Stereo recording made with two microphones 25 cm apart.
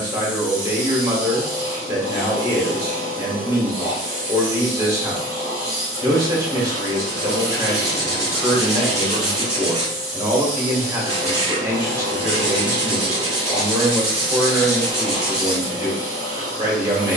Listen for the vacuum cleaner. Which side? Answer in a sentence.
In this clip you hear the vacuum cleaner on the left.